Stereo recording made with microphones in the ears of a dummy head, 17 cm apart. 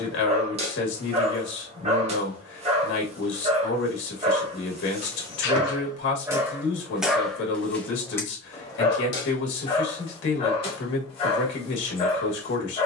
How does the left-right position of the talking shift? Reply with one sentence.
You can hear the talking stay put.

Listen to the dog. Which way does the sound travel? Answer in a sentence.
In this clip you hear the dog move to the left.